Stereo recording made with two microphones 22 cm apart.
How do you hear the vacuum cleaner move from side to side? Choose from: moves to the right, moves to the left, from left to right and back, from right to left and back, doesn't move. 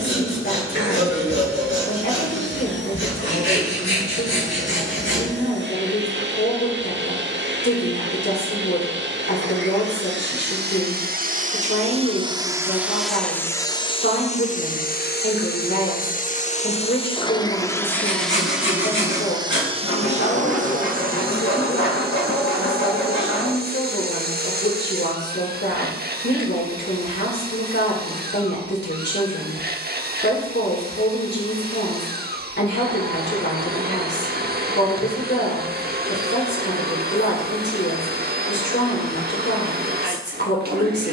from right to left and back.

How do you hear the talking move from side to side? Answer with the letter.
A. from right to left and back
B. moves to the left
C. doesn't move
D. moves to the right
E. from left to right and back
C.